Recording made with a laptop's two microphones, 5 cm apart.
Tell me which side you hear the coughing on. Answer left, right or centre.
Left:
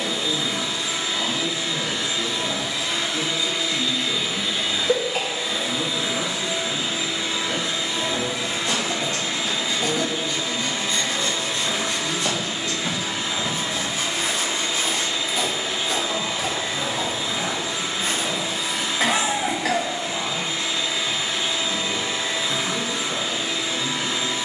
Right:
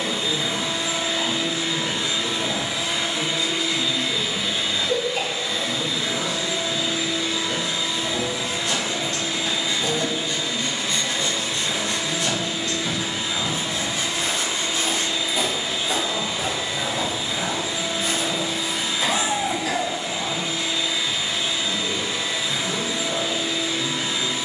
left.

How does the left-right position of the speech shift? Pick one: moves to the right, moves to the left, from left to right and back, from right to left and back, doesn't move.
moves to the right.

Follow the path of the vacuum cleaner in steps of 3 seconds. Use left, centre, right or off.
right, centre, left, left, left, left, left, left.